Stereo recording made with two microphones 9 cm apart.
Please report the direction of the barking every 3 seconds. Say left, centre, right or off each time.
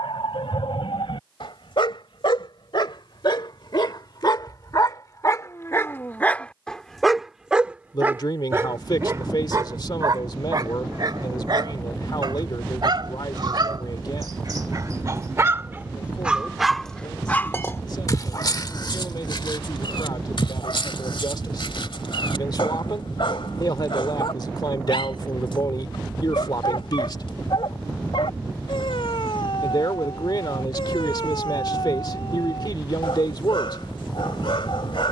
left, left, centre, right, right, centre, left, left, left, left, left, left.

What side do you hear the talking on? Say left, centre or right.
left.